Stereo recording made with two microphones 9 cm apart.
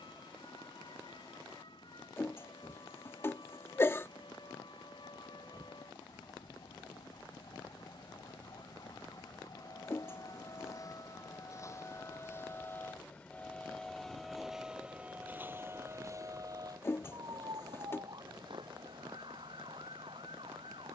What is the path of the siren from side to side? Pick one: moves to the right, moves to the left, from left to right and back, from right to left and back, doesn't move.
moves to the right.